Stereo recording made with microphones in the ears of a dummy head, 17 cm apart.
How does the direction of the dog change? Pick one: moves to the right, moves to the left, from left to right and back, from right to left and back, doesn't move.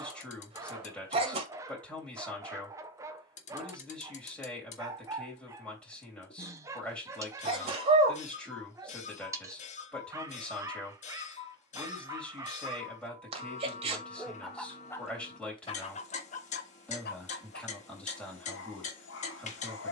moves to the left.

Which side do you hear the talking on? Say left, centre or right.
centre.